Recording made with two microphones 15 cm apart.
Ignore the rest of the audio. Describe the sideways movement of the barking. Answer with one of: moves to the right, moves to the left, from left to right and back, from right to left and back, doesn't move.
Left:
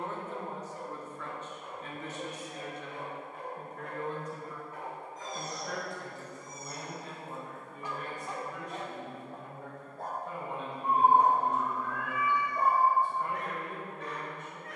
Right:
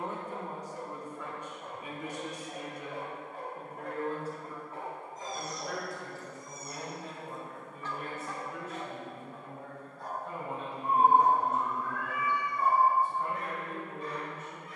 moves to the left.